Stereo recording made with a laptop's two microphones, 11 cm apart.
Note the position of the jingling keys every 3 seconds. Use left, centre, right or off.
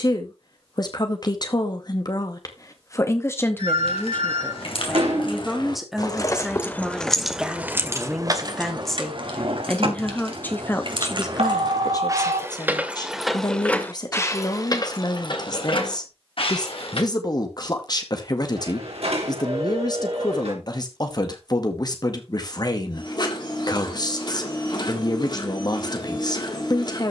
off, left, centre, right, centre, left, off, off, off.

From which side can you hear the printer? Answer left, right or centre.
left.